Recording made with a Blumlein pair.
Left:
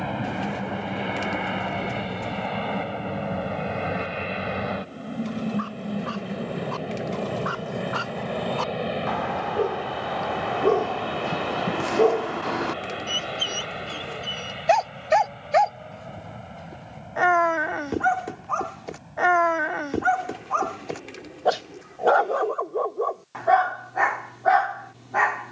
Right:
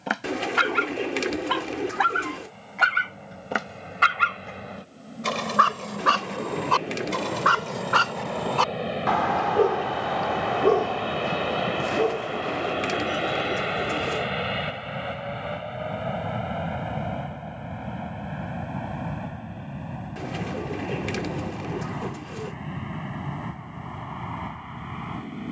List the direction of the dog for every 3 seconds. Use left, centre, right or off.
right, right, right, centre, left, left, left, left, left.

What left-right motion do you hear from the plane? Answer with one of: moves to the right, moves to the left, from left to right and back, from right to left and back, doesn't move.
moves to the right.